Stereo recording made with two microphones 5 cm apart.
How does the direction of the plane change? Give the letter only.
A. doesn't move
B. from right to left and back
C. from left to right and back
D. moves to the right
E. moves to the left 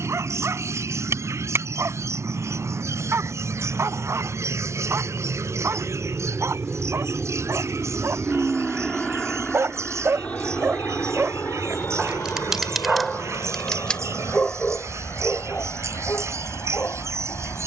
E.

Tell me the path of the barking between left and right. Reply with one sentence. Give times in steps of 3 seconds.
You can hear the barking on the right from 0 s, in the centre from 12 s and on the left from 15 s.